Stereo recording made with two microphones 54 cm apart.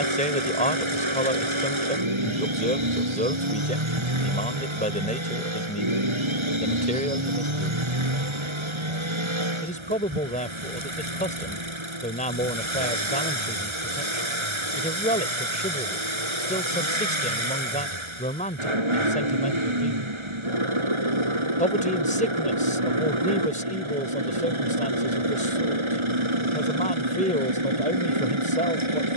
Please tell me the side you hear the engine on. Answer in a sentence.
You can hear the engine on the right.